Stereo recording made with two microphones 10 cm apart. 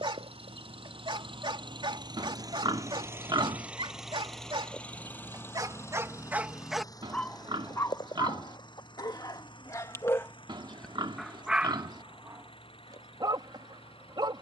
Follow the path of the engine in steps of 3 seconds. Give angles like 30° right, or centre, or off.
50° right, centre, 40° left, 50° left, 60° left.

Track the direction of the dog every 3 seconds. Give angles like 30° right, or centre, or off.
50° right, 50° right, 20° left, 20° left, 40° right.